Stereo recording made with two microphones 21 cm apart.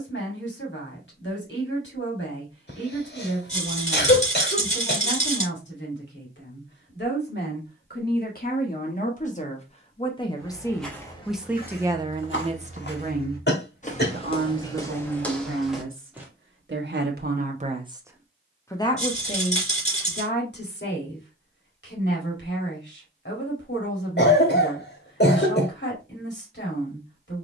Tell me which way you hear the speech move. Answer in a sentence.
You can hear the speech move from left to right and back again.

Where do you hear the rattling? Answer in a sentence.
In this clip you hear the rattling on the left.